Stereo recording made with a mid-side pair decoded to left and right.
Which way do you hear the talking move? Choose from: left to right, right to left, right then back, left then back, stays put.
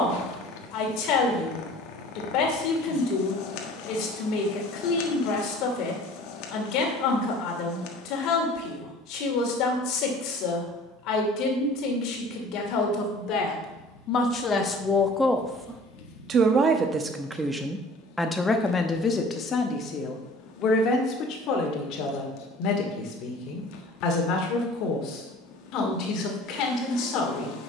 right then back.